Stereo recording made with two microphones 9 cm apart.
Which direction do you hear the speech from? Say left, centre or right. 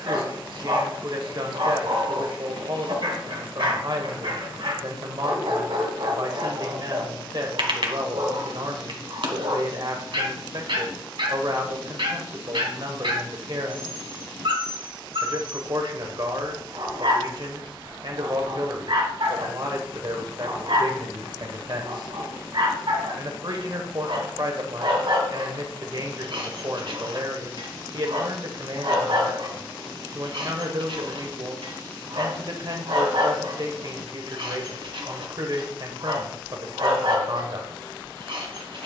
right.